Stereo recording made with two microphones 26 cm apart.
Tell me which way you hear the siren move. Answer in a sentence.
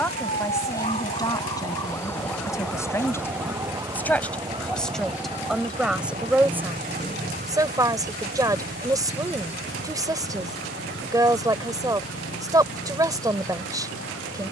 In this clip you hear the siren go from the left side to the right.